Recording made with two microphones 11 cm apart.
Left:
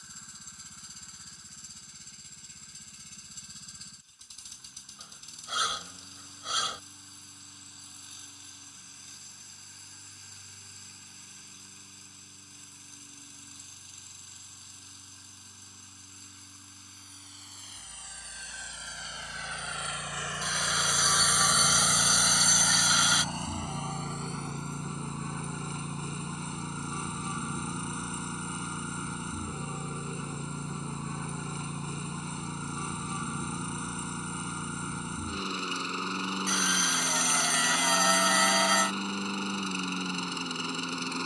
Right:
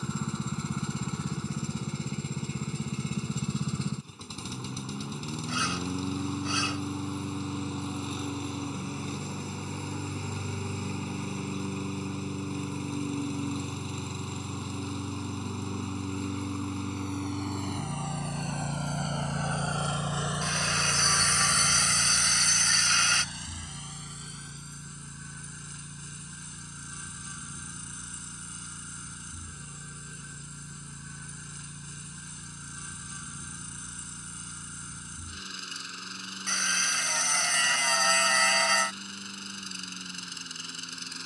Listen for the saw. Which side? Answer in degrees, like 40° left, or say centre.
10° left.